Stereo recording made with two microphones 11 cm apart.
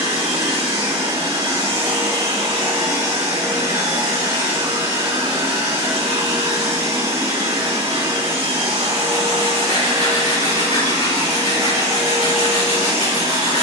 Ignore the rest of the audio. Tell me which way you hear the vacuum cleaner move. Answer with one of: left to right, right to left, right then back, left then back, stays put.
stays put.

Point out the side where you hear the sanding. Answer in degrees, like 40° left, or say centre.
90° left.